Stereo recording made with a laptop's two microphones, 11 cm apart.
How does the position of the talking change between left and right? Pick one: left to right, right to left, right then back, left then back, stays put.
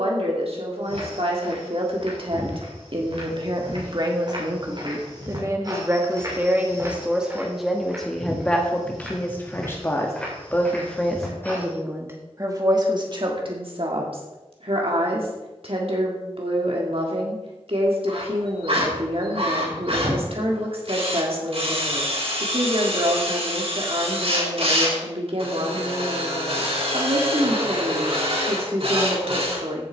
left then back.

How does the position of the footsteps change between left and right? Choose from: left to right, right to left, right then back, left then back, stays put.
right to left.